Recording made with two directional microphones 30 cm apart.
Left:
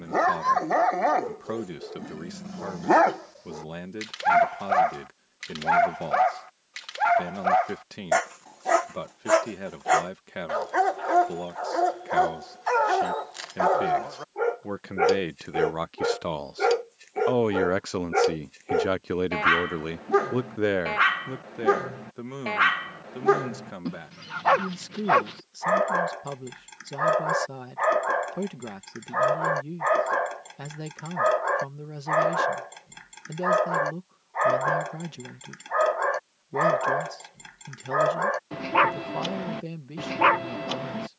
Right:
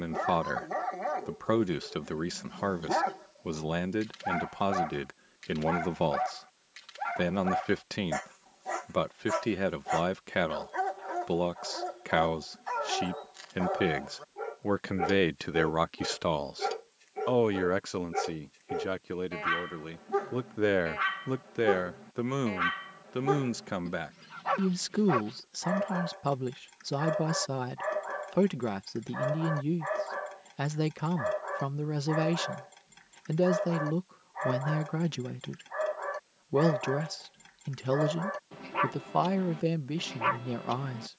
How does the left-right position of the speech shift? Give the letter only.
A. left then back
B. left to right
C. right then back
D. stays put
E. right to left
A.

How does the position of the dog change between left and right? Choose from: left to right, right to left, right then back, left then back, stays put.
stays put.